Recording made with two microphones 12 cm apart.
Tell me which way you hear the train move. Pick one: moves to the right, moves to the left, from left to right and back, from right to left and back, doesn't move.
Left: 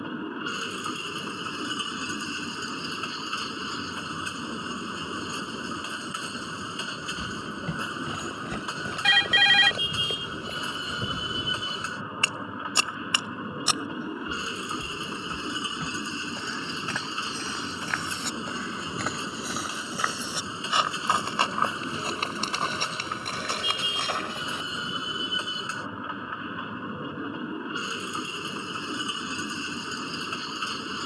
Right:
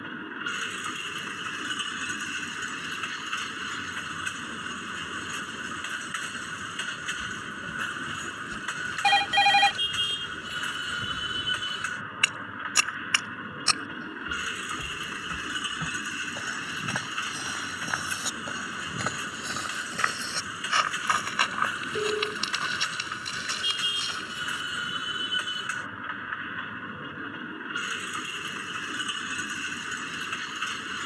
doesn't move.